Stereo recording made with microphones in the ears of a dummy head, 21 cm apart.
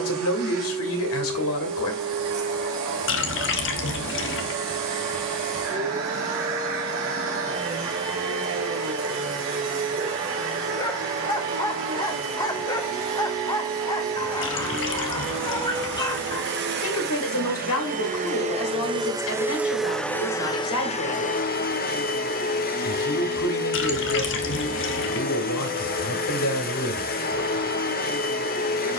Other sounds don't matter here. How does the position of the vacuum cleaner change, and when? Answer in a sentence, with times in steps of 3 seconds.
In this clip you hear the vacuum cleaner on the right from 0 s, in the centre from 18 s and on the left from 21 s.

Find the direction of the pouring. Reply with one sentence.
In this clip you hear the pouring on the left.